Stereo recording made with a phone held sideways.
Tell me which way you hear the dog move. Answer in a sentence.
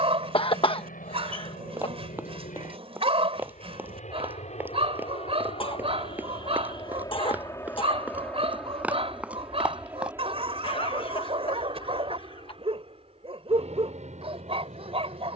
You can hear the dog stay put.